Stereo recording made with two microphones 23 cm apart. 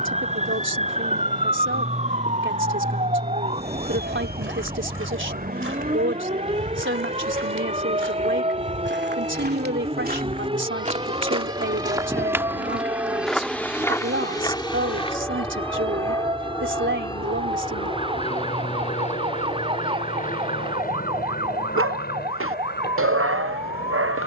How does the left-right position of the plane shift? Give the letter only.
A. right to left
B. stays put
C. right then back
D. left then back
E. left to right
A.